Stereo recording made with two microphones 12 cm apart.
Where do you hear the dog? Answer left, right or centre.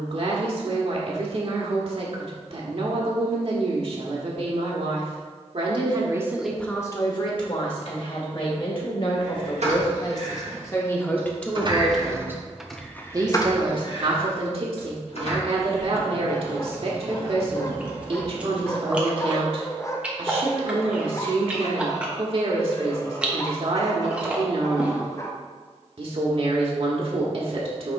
left.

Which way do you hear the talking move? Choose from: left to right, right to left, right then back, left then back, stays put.
left then back.